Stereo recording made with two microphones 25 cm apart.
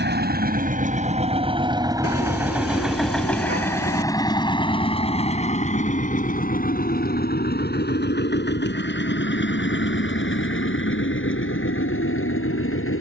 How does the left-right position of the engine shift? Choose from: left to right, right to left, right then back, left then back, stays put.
right to left.